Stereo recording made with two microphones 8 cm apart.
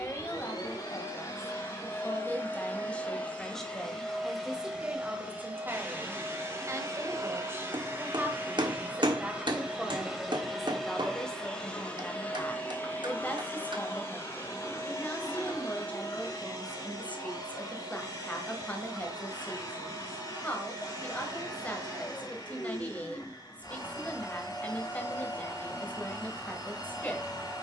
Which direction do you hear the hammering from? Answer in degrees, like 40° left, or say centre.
70° right.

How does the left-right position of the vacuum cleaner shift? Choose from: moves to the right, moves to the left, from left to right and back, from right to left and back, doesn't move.
from left to right and back.